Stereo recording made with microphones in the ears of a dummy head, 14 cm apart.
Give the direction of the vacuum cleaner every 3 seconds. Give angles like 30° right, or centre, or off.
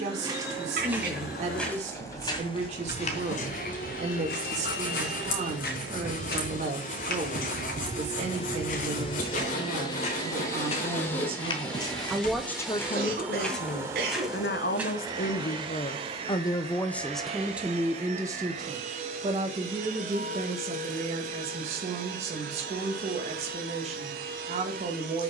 70° left, 60° left, 50° left, 20° left, 10° right, 40° right, 50° right, 60° right, 70° right.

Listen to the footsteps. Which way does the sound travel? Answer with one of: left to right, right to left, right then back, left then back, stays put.
left then back.